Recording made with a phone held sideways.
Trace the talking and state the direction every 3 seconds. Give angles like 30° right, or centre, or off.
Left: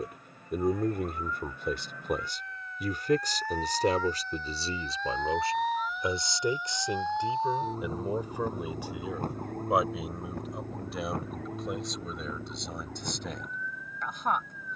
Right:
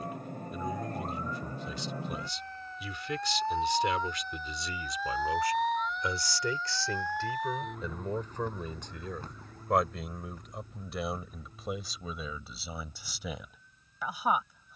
60° left, 40° left, 10° left, centre, 10° right.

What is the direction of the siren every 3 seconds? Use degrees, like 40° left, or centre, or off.
40° right, 10° right, 30° left, 60° left, 70° left.